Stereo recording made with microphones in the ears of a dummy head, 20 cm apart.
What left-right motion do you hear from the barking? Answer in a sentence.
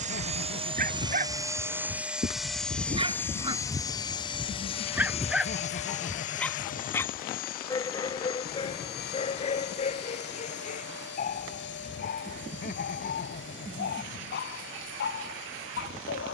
You can hear the barking go from the right side to the left.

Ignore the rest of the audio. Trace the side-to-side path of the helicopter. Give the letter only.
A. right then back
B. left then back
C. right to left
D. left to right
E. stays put
C.